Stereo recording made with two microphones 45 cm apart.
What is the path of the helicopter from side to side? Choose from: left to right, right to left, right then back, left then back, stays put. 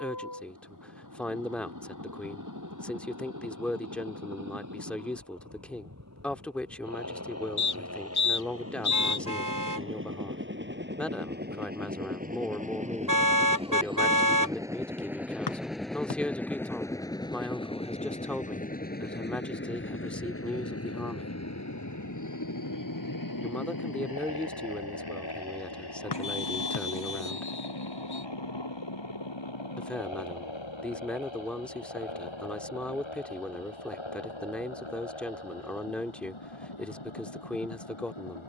right to left.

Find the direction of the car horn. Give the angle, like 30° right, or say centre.
50° right.